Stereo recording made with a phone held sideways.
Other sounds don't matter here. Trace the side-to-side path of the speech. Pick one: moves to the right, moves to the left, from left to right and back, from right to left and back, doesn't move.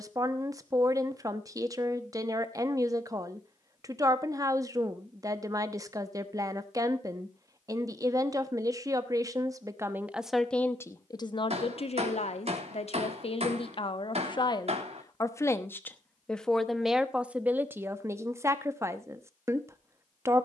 from right to left and back.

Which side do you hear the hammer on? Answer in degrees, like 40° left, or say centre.
50° right.